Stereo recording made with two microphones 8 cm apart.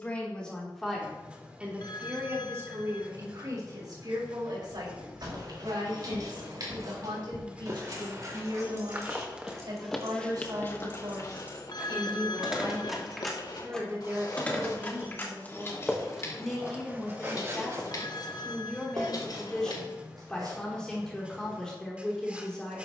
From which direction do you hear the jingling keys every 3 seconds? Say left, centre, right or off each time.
off, right, right, right, centre, left, left, off.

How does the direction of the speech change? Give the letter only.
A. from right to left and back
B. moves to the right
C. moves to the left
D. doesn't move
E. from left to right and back
E.